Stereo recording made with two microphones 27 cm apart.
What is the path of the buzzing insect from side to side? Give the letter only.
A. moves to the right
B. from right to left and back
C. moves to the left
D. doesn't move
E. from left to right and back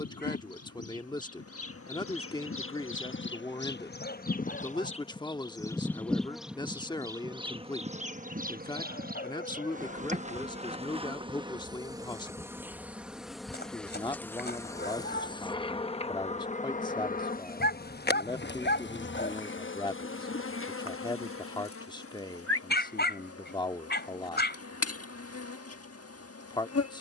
E.